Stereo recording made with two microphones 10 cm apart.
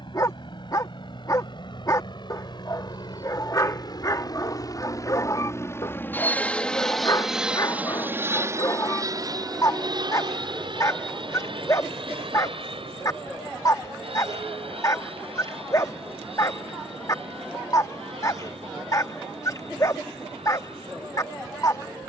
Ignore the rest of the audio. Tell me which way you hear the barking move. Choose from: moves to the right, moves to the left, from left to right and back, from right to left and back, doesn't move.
doesn't move.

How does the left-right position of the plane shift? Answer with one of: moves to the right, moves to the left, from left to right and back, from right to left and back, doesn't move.
moves to the right.